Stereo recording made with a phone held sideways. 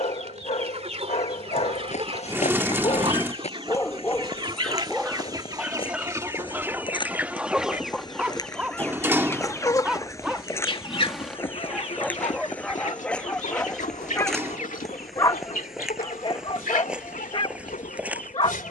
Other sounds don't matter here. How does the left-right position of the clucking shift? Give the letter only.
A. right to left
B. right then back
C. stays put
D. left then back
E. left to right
A.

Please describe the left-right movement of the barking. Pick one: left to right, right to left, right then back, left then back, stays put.
right then back.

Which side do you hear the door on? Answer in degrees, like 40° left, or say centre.
20° right.